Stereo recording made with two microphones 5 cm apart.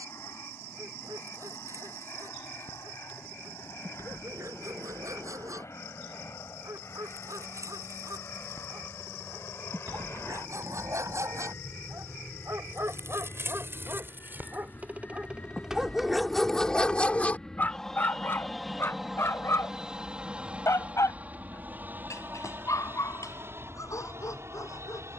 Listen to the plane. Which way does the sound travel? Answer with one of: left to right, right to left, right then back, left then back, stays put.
left to right.